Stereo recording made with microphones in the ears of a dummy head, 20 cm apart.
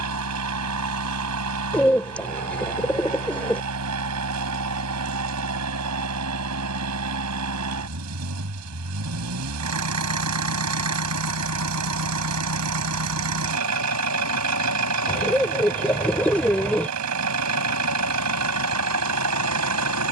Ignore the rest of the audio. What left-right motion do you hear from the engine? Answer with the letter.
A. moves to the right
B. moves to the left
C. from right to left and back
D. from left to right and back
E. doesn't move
E.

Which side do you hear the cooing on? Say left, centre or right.
centre.